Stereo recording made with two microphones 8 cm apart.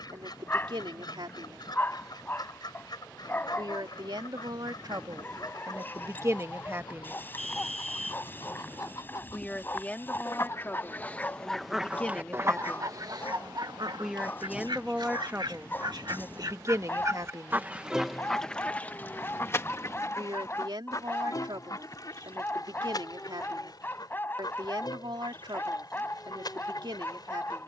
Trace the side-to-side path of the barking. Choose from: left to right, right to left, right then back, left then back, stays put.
stays put.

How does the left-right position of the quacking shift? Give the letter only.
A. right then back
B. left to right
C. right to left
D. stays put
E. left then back
A.